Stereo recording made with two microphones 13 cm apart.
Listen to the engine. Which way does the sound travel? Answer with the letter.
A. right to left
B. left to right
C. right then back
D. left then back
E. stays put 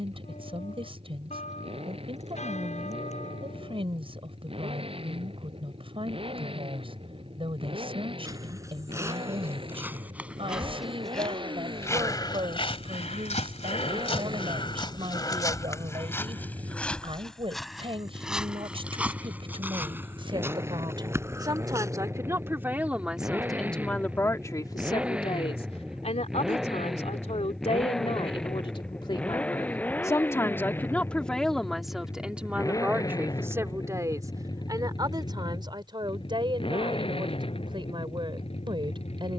A.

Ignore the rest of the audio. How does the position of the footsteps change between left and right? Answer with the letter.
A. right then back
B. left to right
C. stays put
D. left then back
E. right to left
D.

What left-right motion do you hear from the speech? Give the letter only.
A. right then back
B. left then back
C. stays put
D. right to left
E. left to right
B.